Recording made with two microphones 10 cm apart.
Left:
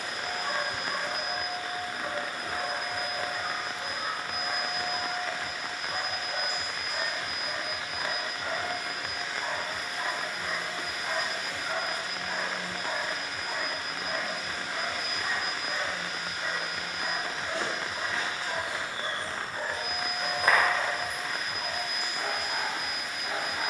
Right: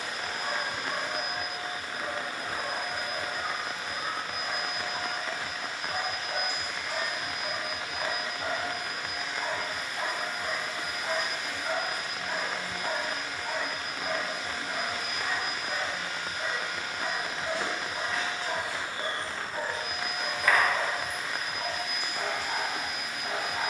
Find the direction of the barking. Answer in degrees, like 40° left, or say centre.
50° right.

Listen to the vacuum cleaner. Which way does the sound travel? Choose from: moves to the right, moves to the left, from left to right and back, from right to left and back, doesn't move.
doesn't move.